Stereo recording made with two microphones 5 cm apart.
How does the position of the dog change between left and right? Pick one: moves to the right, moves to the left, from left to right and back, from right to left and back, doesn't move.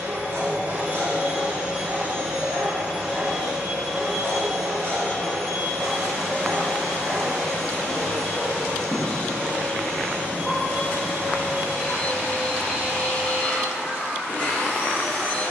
moves to the left.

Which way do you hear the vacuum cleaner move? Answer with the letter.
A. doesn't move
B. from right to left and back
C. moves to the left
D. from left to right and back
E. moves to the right
C.